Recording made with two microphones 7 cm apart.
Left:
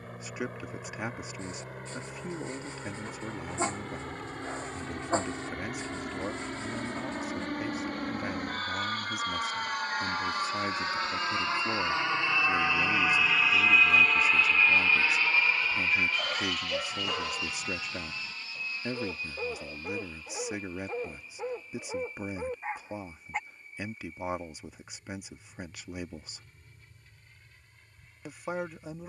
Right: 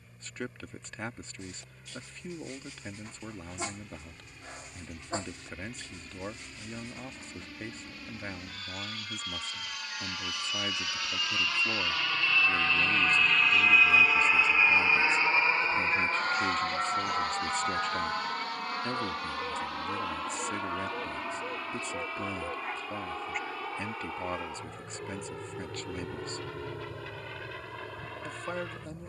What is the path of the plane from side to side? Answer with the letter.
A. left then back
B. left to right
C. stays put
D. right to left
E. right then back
B.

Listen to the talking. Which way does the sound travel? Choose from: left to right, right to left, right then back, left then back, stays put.
stays put.